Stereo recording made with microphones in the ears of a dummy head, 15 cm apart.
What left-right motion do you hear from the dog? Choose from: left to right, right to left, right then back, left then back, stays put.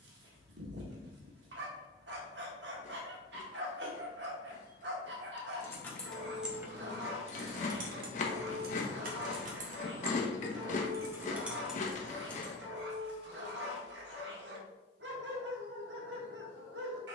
stays put.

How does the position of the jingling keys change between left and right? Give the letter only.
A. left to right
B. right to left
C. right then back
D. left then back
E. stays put
C.